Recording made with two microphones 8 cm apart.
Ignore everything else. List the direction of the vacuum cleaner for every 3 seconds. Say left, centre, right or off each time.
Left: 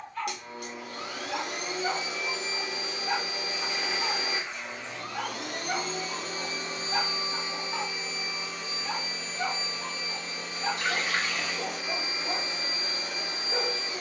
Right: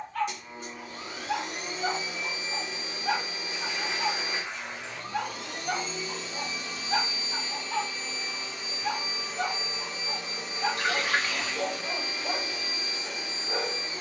left, left, left, centre, left.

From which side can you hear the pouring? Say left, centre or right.
right.